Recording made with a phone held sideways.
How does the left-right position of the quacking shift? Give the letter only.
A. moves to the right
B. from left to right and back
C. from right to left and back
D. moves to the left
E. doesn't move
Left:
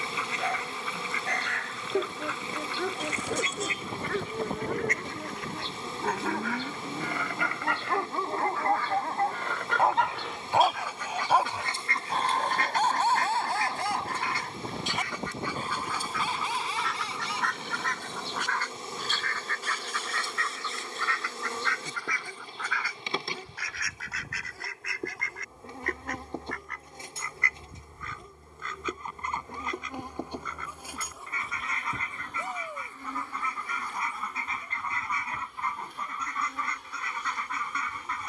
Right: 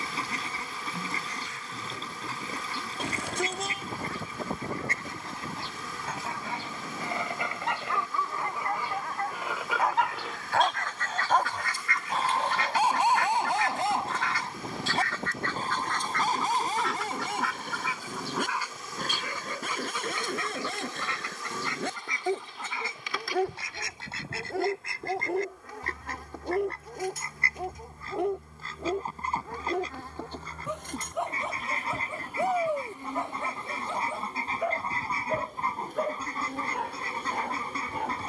C.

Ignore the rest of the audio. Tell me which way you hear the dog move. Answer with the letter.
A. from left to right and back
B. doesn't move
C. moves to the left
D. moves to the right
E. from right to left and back
D.